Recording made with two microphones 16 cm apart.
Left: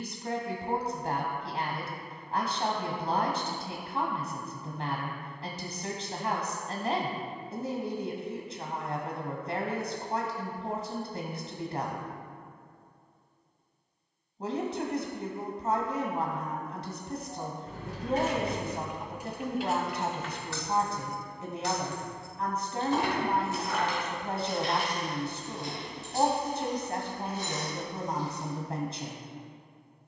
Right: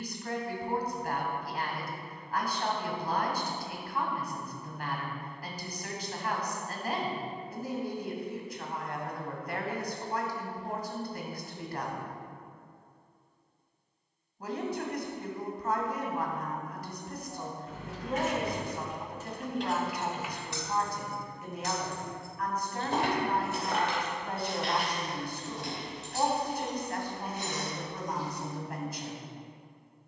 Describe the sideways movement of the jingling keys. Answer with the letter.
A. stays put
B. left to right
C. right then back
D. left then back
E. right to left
B.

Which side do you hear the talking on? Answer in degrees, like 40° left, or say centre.
30° left.